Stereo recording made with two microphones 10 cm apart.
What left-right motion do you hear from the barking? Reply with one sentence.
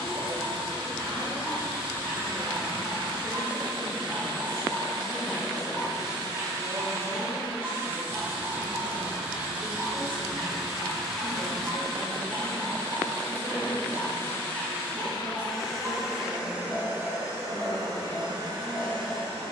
In this clip you hear the barking stay in one place.